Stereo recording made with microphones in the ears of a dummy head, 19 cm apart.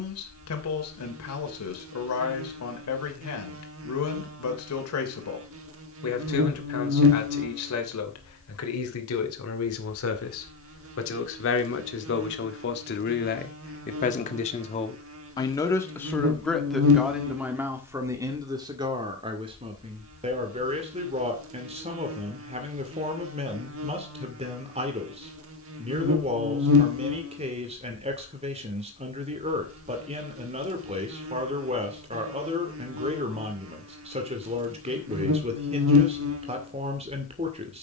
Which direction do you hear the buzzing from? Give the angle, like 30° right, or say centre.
70° right.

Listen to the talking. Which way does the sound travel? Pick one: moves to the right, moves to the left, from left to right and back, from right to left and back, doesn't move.
moves to the right.